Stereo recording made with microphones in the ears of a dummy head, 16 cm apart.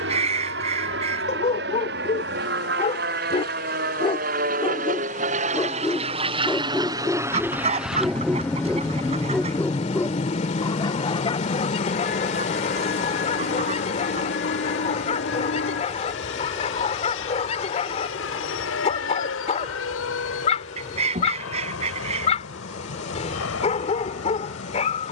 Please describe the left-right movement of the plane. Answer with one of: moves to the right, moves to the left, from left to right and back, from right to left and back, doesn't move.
moves to the left.